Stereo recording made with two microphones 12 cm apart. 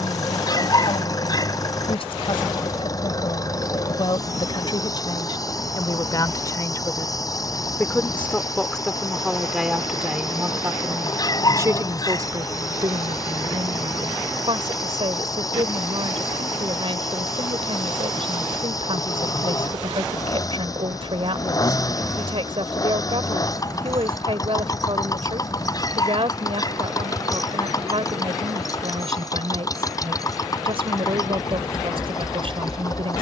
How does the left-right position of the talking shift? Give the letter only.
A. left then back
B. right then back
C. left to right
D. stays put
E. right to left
C.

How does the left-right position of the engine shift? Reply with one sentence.
In this clip you hear the engine stay in one place.